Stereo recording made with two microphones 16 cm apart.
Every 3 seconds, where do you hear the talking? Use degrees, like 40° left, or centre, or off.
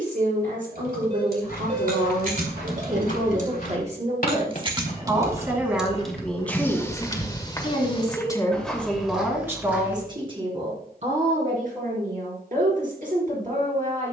60° right, 30° right, 20° left, 30° right, 60° right.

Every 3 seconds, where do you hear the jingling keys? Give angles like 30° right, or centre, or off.
70° right, 30° right, 20° left, off, off.